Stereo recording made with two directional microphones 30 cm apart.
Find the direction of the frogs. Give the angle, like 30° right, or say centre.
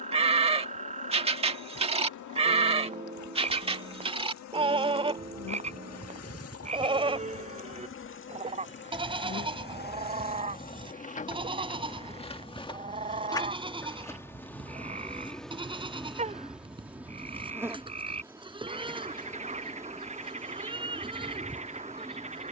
20° right.